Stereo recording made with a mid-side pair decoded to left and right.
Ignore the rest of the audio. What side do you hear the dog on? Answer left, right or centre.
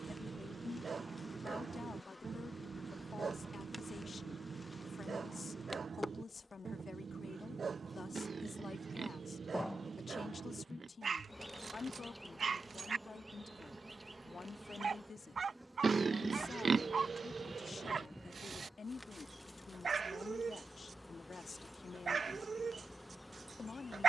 right.